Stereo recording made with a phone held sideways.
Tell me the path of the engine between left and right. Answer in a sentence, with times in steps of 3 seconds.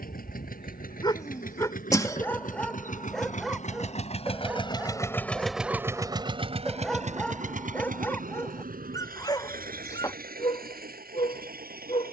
You can hear the engine on the left from 0 s and on the right from 6 s.